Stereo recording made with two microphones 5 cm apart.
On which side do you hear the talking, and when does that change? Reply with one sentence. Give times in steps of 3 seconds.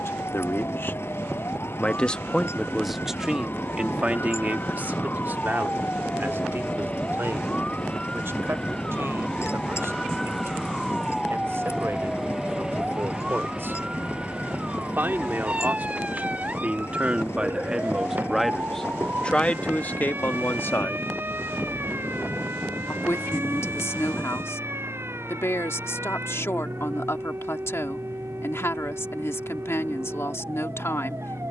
You can hear the talking on the left from 0 s, on the right from 3 s and on the left from 18 s.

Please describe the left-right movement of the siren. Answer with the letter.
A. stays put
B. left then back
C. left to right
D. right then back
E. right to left
C.